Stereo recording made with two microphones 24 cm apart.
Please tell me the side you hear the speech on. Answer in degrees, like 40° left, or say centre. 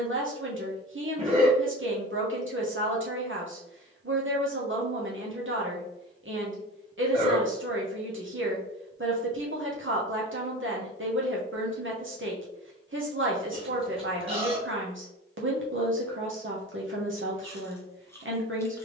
50° right.